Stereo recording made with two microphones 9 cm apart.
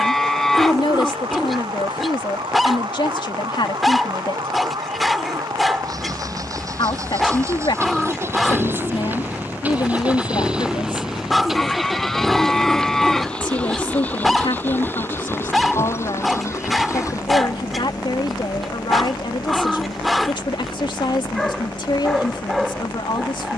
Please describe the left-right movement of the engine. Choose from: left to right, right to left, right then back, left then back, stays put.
right to left.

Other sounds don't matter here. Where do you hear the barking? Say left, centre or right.
centre.